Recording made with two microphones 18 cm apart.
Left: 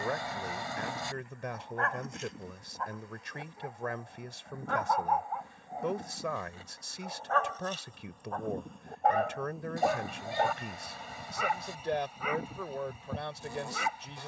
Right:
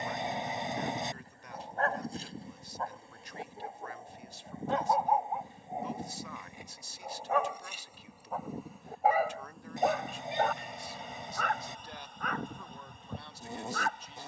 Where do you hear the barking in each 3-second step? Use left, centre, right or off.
right, right, centre, centre, centre.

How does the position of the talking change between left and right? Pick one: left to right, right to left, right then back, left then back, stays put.
stays put.